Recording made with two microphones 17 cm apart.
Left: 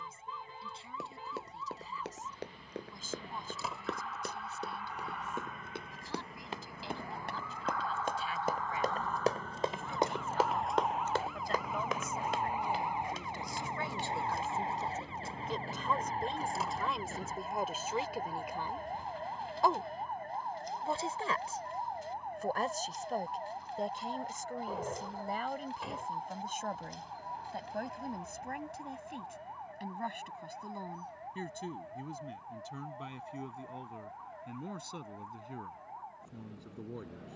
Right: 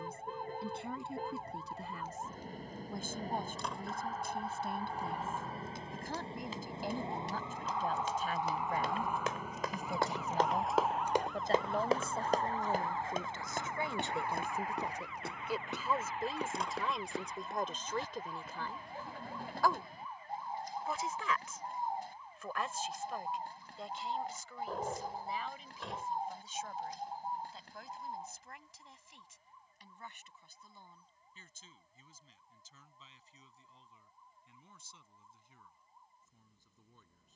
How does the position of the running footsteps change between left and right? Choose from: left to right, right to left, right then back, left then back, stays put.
left to right.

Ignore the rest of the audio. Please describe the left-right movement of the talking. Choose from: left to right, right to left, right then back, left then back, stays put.
right to left.